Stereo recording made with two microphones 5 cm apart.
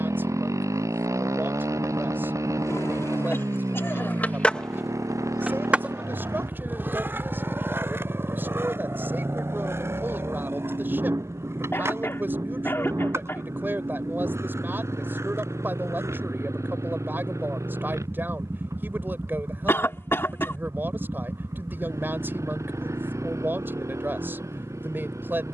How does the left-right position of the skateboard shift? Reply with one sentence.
In this clip you hear the skateboard travel towards the right.